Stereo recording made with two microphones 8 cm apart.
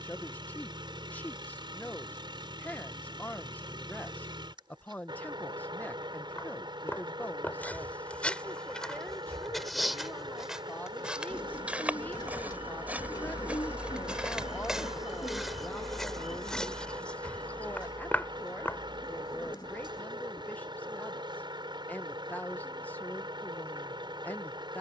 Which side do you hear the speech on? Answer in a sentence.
In this clip you hear the speech on the left.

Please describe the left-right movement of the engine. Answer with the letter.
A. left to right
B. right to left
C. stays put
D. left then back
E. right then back
C.